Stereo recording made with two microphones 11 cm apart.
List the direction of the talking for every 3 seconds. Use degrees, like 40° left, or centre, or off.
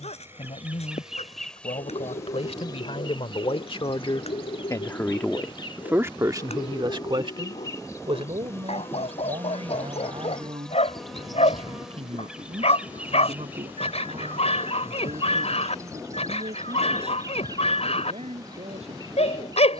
70° left, 40° left, 50° right, 70° right, 80° right, 80° right, 80° right.